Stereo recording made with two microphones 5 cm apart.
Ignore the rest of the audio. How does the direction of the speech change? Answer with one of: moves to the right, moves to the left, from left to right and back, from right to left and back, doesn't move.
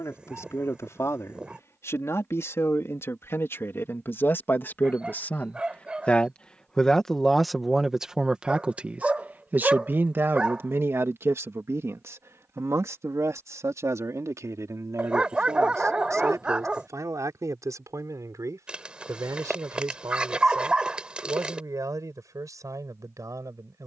moves to the right.